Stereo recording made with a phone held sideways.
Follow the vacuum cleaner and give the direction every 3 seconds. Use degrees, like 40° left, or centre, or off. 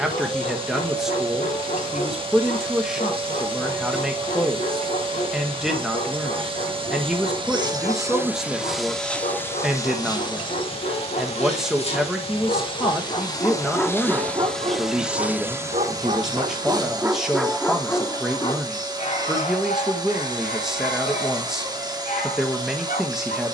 30° right, 30° right, 20° right, 30° left, 20° left, 20° right, 30° right, 30° right.